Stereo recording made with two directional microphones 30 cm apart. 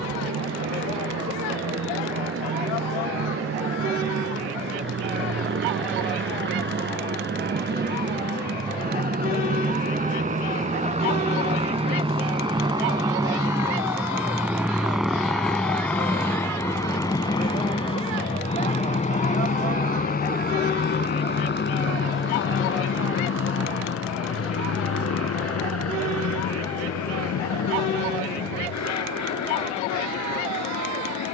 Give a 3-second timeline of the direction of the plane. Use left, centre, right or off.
right, right, right, right, centre, centre, left, left, left, left, left.